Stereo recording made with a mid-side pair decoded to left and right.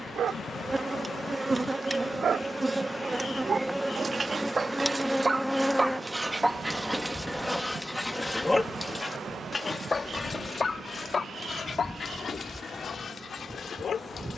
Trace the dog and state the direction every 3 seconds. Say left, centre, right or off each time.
right, right, centre, left, left.